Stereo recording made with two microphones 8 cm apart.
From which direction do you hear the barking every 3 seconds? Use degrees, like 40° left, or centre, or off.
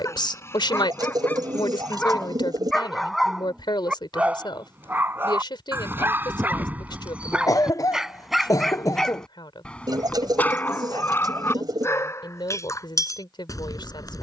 20° left, 20° right, 10° right, 20° left, 40° left.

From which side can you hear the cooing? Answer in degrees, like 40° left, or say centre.
50° right.